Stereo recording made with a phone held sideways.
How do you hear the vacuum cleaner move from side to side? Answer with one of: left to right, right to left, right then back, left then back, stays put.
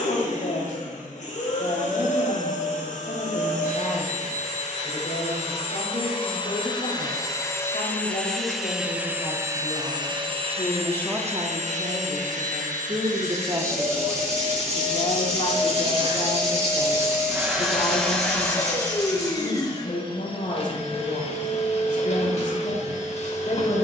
right then back.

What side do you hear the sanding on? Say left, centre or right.
right.